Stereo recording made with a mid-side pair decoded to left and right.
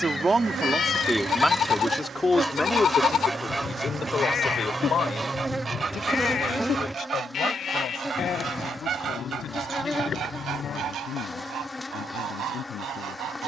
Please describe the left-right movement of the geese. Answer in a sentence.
In this clip you hear the geese go from the left side to the right.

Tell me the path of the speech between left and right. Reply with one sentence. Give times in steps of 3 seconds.
In this clip you hear the speech in the centre from 0 s and on the left from 3 s.